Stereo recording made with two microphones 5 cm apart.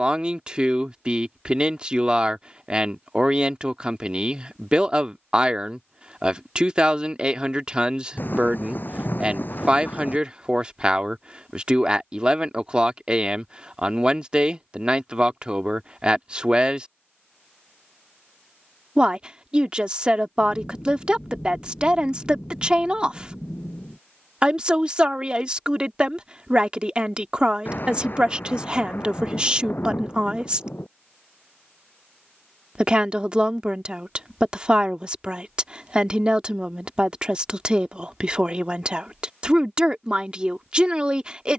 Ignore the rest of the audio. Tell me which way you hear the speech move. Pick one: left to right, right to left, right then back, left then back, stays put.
stays put.